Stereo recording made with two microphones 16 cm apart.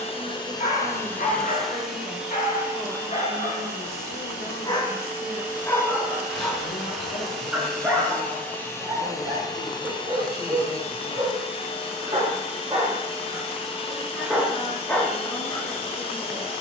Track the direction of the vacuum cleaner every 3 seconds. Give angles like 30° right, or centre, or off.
10° left, 10° right, centre, 30° left, 30° left, 30° left.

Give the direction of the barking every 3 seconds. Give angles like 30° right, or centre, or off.
50° left, 30° left, 10° right, 30° right, 20° right, 20° left.